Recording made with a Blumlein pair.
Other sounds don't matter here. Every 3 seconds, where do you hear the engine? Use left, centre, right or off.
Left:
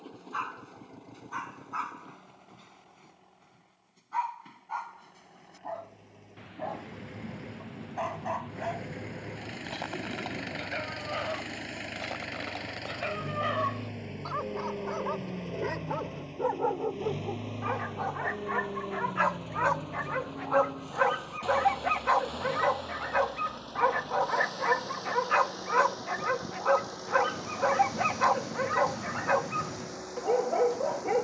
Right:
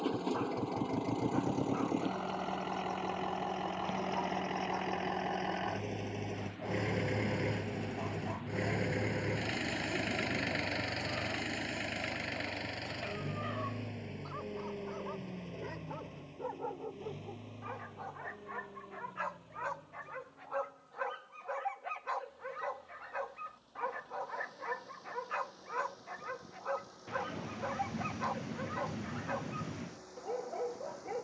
right, right, right, centre, centre, left, left, left, left, left, left.